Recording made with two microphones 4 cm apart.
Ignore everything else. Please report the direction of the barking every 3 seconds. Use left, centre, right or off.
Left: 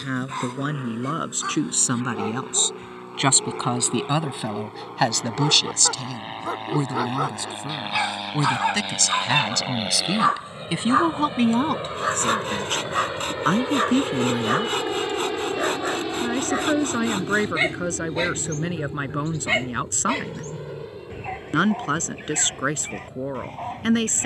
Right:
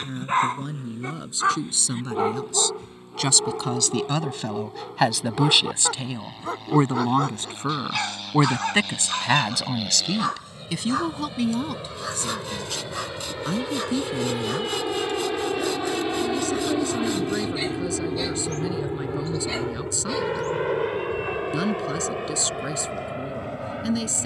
right, centre, centre, left, left, left, left, left.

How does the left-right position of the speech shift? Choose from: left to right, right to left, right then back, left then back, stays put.
right then back.